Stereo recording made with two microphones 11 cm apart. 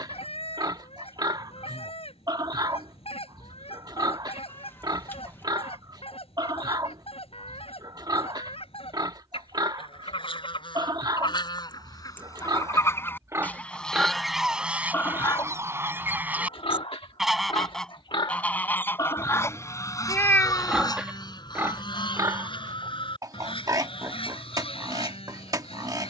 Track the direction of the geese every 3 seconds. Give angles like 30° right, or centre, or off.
60° left, 60° left, 60° left, 50° left, 10° left, 10° right, 20° left, 50° left, 60° left.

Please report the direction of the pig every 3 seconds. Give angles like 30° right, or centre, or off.
40° right, 40° right, 40° right, 40° right, 20° right, 40° left, 20° left, 30° right, 30° right.